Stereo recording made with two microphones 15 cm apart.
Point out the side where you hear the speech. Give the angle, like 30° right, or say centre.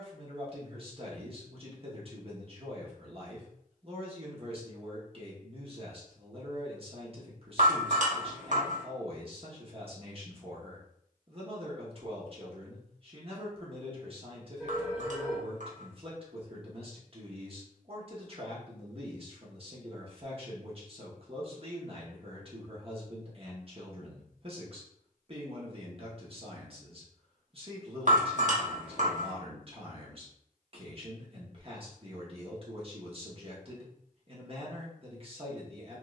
40° right.